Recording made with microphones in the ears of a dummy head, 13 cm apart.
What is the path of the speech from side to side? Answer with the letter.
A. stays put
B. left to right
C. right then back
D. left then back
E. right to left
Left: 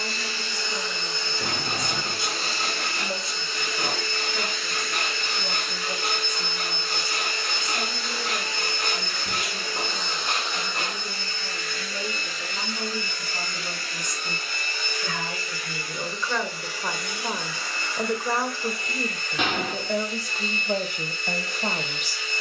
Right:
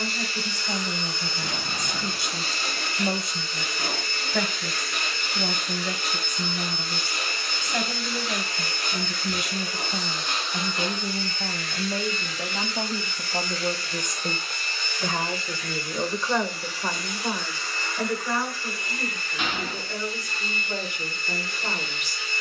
E.